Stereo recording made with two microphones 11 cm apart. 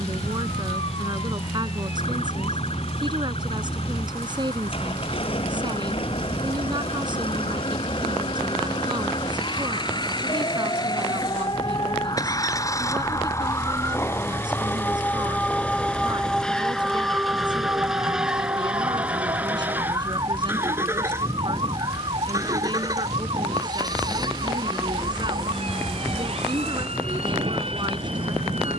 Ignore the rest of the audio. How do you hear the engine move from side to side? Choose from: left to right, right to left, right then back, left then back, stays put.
left to right.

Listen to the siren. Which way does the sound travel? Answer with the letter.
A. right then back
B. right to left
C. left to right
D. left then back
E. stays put
C.